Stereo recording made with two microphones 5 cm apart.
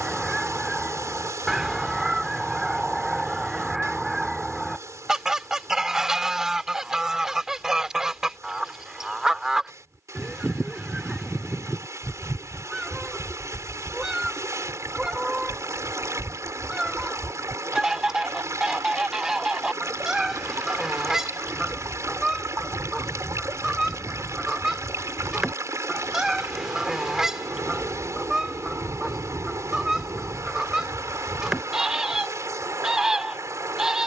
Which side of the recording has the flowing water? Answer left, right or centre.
right.